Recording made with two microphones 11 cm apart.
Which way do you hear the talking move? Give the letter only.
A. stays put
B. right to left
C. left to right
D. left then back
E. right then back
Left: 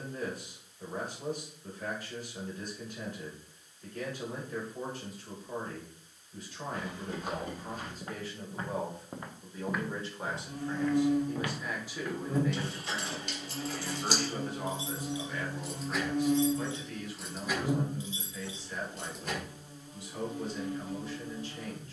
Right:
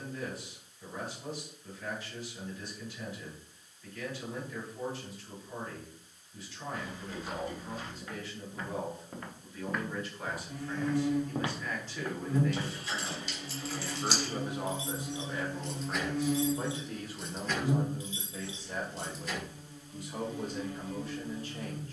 C.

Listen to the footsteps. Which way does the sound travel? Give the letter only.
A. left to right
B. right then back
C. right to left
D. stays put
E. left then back
A.